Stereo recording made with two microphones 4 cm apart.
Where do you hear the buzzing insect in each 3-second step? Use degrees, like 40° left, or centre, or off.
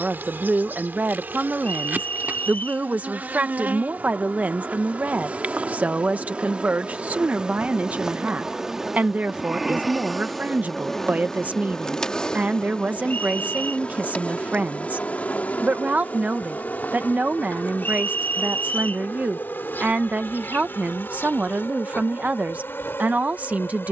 50° right, 40° right, 20° right, centre, 30° left, 40° left, 50° left, 60° left.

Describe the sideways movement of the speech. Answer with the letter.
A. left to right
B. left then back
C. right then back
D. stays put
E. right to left
D.